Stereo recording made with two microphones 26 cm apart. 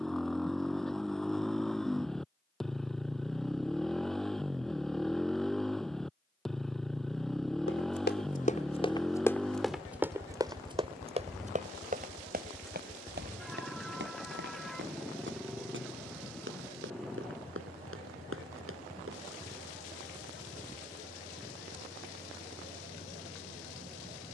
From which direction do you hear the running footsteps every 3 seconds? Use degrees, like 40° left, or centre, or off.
off, off, 30° left, 10° right, 40° right, 50° right, 50° right, off.